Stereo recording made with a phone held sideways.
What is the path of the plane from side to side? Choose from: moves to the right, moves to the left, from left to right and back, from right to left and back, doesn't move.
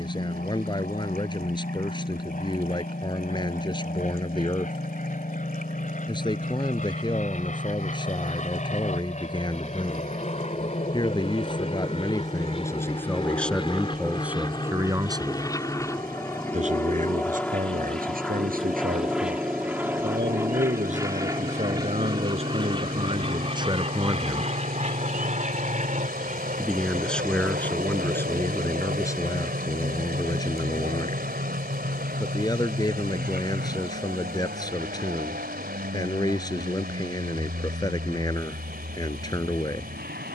moves to the right.